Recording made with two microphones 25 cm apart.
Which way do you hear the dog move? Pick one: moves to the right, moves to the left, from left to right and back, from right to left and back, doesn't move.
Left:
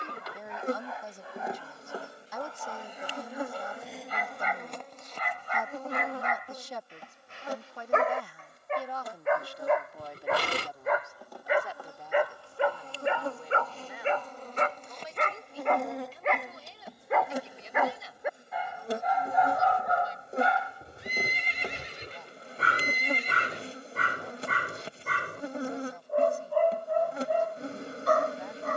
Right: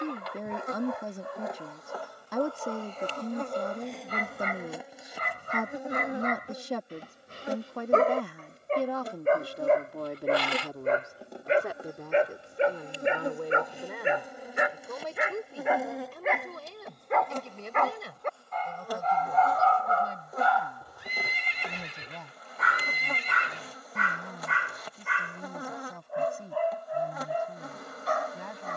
moves to the left.